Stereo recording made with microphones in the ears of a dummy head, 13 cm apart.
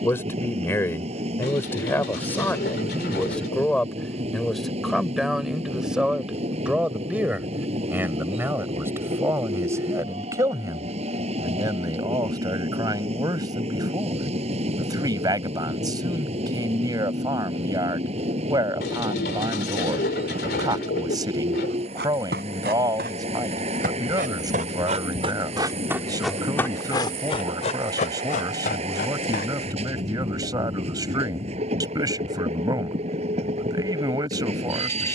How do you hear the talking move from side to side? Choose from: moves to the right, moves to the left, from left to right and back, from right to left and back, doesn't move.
moves to the right.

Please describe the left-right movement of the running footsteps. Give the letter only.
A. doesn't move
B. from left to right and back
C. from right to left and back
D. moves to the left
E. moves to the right
D.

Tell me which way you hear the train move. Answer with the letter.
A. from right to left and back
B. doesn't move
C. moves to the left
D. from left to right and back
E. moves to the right
B.